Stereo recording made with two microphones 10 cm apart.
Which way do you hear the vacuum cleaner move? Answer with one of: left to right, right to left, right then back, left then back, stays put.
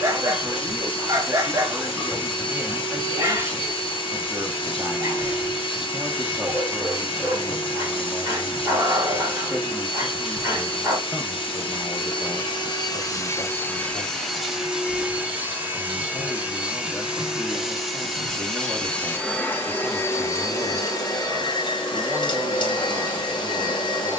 right then back.